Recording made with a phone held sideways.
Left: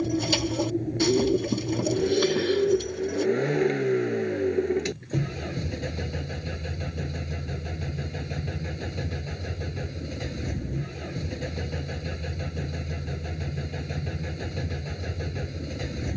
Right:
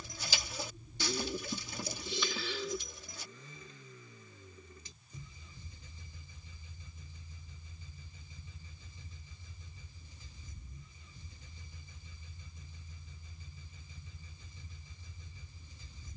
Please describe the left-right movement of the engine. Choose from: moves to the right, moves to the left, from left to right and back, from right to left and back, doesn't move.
doesn't move.